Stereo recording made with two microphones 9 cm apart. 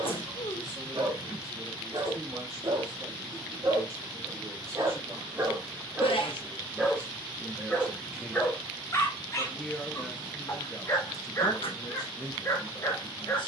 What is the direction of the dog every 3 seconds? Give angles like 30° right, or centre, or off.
60° right, 40° right, 10° left, 30° left, 40° left.